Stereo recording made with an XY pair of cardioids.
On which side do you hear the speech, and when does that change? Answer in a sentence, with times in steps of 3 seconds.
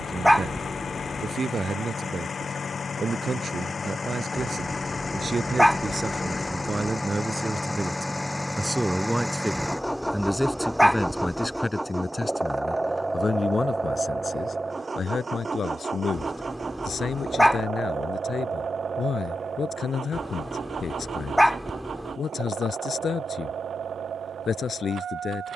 You can hear the speech on the right from 0 s, in the centre from 9 s and on the left from 12 s.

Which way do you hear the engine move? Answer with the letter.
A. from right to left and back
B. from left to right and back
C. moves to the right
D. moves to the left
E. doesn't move
C.